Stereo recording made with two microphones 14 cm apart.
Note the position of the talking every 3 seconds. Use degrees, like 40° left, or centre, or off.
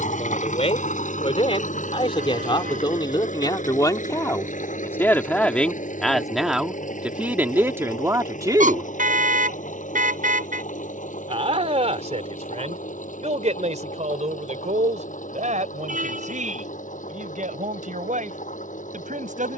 40° left, 20° left, 10° right, 50° right, 60° right, 70° right, 70° right.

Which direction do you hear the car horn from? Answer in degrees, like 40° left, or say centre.
80° right.